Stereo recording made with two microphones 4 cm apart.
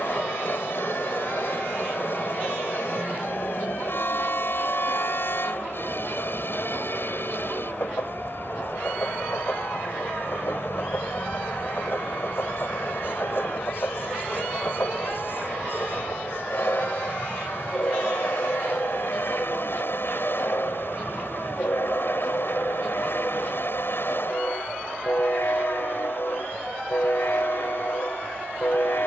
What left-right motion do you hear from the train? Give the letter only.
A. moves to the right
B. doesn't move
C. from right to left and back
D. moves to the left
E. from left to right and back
B.